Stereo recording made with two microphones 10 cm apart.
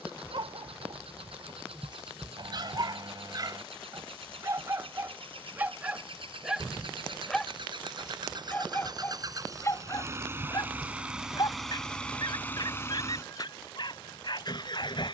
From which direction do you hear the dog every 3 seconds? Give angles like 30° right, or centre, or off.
50° right, 30° right, 10° left, 40° left, 50° left.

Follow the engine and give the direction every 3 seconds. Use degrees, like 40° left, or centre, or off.
70° right, 70° right, 50° right, 20° right, 30° left.